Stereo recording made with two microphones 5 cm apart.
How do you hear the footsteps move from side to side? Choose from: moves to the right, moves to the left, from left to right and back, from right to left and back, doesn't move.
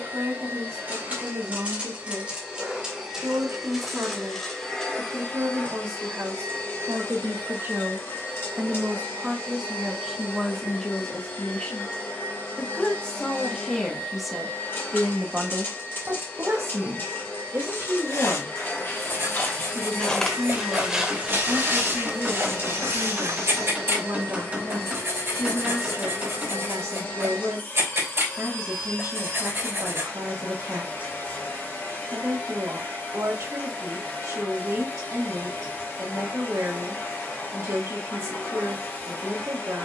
moves to the right.